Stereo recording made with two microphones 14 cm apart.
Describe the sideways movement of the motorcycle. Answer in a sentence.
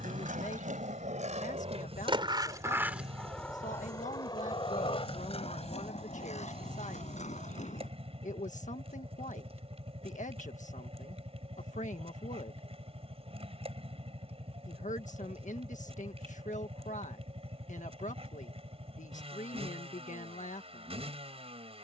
You can hear the motorcycle stay put.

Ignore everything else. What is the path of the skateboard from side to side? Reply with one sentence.
You can hear the skateboard go from the right side to the left.